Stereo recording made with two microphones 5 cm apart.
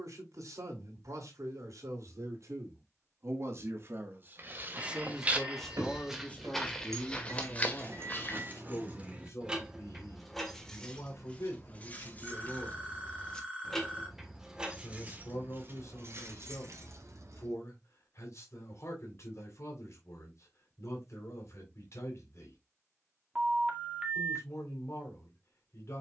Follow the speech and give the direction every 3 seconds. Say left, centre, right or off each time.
right, right, left, left, left, left, left, left, left.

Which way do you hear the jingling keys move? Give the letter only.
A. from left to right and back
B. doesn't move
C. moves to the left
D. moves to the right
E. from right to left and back
E.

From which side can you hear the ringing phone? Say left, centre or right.
right.